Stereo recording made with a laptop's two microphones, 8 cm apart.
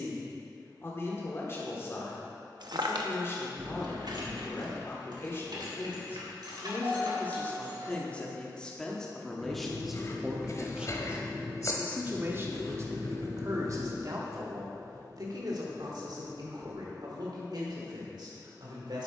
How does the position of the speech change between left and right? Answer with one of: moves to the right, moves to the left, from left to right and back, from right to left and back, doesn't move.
moves to the right.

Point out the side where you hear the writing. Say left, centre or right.
left.